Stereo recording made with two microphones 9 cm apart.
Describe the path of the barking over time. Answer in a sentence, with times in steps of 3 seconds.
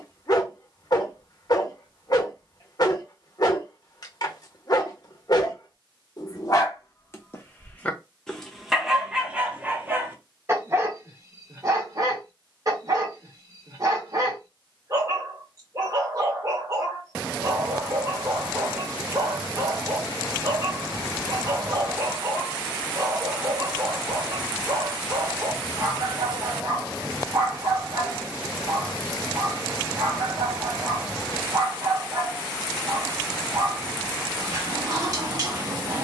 In this clip you hear the barking on the left from 0 s and on the right from 9 s.